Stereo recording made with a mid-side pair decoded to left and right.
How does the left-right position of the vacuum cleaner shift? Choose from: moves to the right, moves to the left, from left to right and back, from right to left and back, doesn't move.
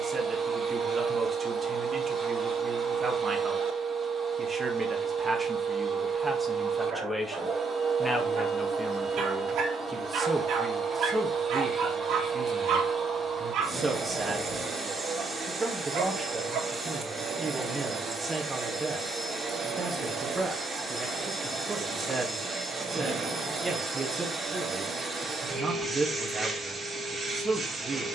doesn't move.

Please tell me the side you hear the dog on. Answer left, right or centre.
right.